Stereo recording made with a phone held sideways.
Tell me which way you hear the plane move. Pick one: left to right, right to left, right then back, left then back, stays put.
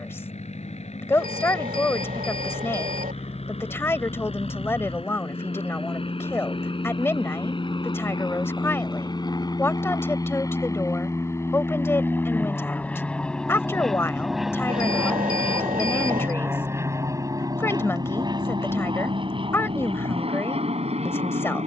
left to right.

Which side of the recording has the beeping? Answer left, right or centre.
right.